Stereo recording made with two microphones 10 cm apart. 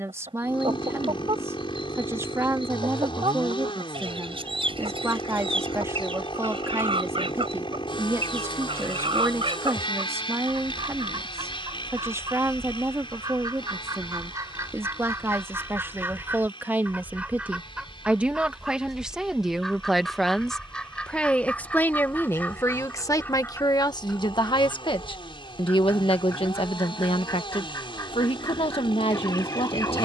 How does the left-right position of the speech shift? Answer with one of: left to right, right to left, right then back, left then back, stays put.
right to left.